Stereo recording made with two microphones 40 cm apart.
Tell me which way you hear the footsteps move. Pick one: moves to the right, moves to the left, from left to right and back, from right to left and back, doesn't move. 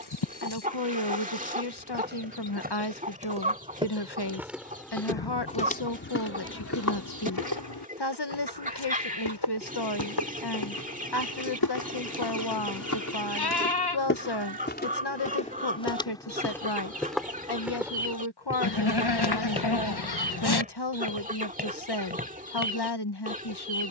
from right to left and back.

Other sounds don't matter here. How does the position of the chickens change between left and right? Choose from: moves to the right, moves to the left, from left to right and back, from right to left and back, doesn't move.
doesn't move.